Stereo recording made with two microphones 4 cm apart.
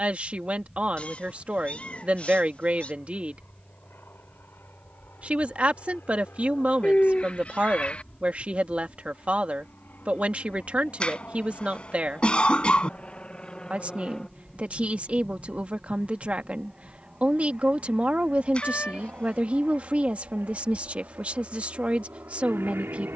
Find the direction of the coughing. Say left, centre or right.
left.